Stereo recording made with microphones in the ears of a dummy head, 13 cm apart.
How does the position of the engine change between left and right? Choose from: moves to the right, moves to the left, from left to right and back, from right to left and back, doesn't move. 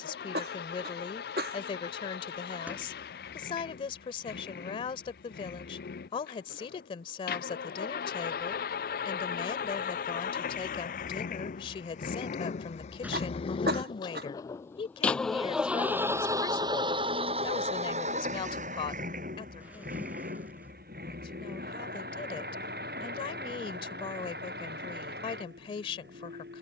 moves to the right.